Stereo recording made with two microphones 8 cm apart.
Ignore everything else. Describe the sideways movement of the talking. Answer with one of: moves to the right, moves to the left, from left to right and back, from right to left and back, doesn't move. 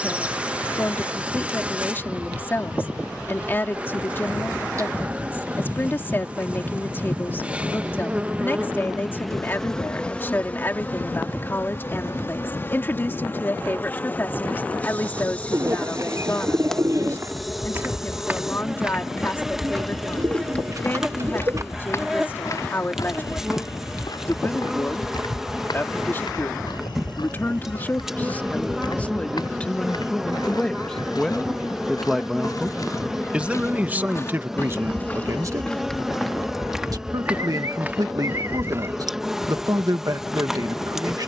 moves to the right.